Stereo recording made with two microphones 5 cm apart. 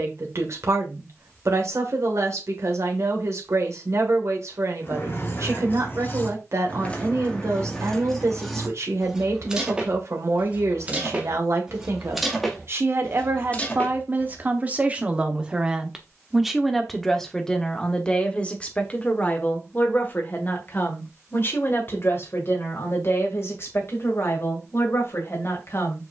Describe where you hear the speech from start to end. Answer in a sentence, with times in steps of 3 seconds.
In this clip you hear the speech on the right from 0 s, in the centre from 15 s and on the left from 18 s.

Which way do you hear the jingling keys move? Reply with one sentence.
You can hear the jingling keys go right and come back.